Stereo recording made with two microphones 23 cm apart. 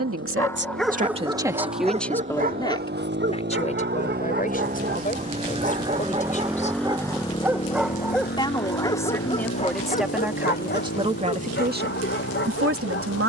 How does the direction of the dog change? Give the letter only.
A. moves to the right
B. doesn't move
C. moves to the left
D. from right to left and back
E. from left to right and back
E.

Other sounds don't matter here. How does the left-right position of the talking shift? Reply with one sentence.
You can hear the talking move from right to left and back again.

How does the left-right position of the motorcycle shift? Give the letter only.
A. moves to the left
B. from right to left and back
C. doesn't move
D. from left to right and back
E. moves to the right
A.